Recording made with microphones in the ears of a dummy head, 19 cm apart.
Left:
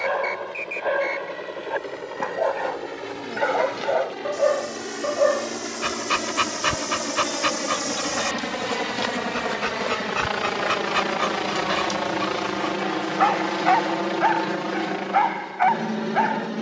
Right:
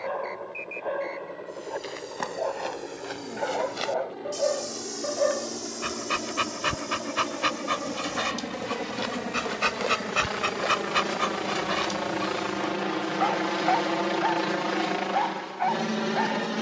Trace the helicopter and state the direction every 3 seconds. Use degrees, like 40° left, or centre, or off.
60° left, 60° left, 50° left, 30° left, centre, 30° right.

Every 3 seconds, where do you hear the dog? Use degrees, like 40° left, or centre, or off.
50° left, 30° left, centre, 10° right, 30° left, 50° left.